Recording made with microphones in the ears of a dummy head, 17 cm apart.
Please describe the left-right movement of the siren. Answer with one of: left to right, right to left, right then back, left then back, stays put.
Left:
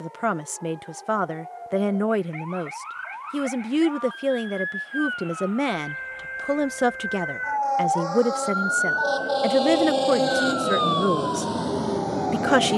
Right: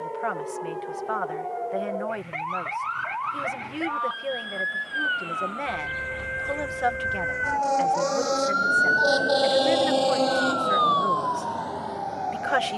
right to left.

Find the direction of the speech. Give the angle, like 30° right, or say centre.
60° left.